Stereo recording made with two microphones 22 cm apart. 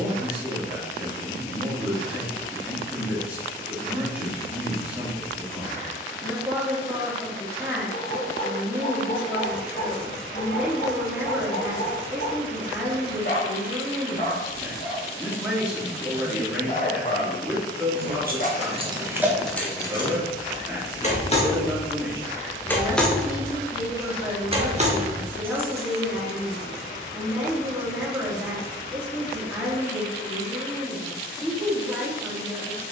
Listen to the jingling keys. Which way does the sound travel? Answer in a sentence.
You can hear the jingling keys move from right to left and back again.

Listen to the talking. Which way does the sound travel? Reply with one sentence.
You can hear the talking stay in one place.